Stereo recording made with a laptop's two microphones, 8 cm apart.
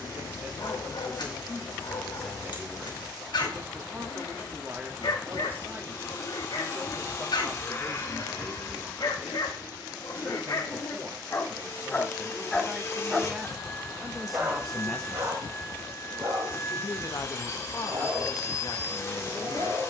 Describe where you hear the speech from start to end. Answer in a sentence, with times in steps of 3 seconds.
You can hear the speech on the right from 0 s, in the centre from 12 s and on the left from 15 s.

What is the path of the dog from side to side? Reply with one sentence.
You can hear the dog travel towards the right.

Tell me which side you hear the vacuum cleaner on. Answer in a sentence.
You can hear the vacuum cleaner on the left.